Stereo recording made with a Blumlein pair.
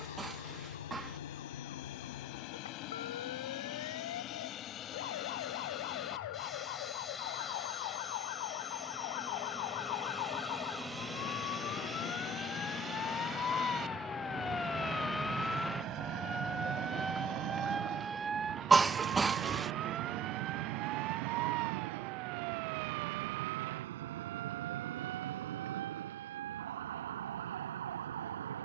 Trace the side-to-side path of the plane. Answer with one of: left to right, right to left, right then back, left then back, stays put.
left to right.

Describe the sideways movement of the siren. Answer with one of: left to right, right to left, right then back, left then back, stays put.
left to right.